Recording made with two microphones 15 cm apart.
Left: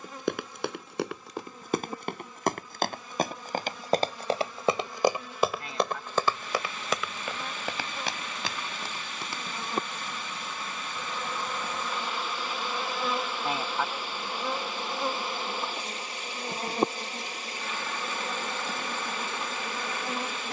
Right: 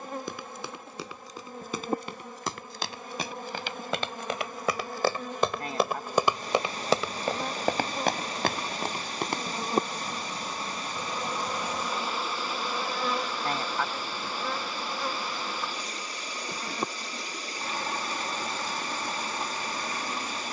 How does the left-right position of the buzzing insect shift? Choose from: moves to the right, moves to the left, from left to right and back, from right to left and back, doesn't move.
moves to the left.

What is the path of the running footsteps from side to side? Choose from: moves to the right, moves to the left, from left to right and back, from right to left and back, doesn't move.
moves to the right.